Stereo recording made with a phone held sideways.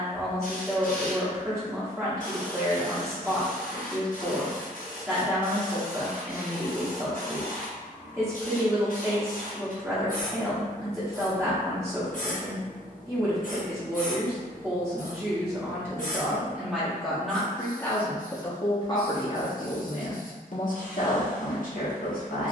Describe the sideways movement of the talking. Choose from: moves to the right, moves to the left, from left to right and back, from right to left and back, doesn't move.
moves to the left.